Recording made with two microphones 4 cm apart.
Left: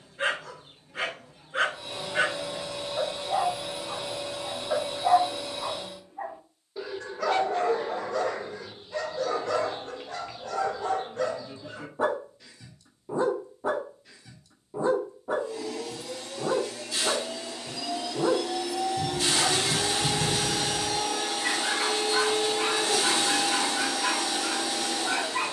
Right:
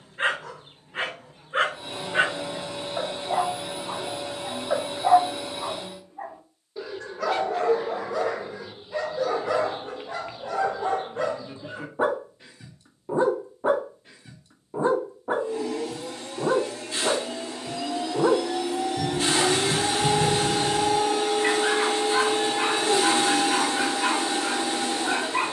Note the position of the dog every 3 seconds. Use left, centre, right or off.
right, right, centre, right, right, right, right, right, right.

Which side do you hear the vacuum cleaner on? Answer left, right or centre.
right.